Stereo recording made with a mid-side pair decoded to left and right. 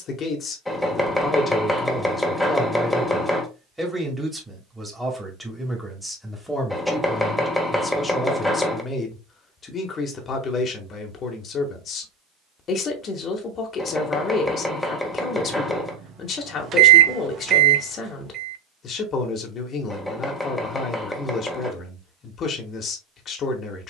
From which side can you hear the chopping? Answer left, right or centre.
centre.